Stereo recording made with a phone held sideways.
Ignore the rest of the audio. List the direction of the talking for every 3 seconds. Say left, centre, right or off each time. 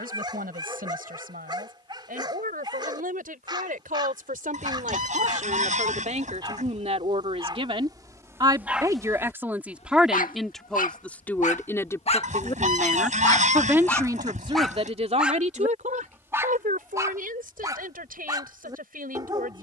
right, right, right, centre, centre, right, right.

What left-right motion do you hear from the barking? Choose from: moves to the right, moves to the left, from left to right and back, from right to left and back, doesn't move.
from right to left and back.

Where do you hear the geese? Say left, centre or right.
right.